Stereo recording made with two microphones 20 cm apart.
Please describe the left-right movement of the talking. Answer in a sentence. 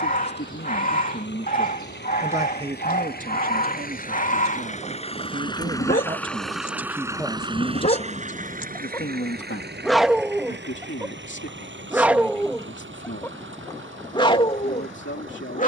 You can hear the talking go right and come back.